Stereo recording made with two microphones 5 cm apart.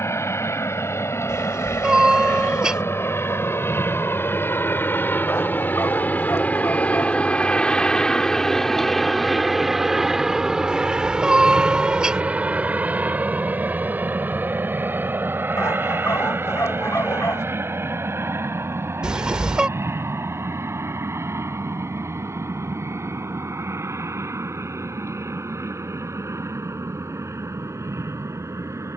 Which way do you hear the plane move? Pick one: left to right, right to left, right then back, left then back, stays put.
left to right.